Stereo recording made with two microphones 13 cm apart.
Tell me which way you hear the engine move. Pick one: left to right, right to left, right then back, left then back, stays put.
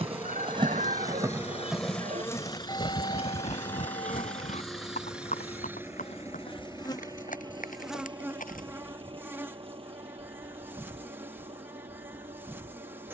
left to right.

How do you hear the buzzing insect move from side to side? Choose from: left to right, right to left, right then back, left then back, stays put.
left then back.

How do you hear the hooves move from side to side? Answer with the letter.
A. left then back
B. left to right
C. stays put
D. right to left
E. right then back
D.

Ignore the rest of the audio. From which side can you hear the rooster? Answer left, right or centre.
right.